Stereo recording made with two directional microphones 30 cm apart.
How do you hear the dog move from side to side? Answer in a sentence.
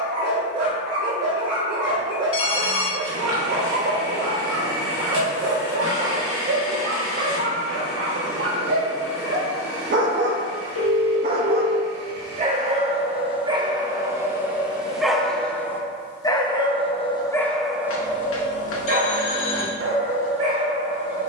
You can hear the dog move from right to left and back again.